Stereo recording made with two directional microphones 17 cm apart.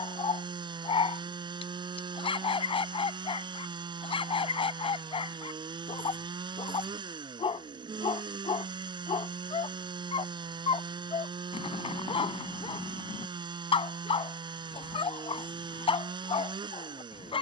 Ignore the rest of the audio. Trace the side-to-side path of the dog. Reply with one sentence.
You can hear the dog stay in one place.